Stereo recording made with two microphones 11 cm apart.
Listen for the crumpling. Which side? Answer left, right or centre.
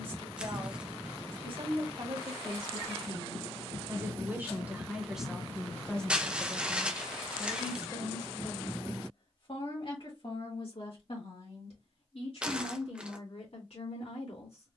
centre.